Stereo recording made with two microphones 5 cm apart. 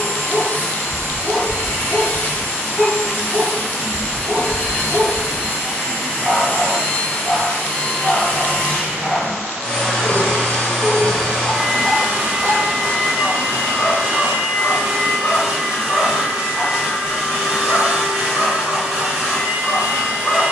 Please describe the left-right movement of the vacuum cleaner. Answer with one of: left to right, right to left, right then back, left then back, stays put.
left to right.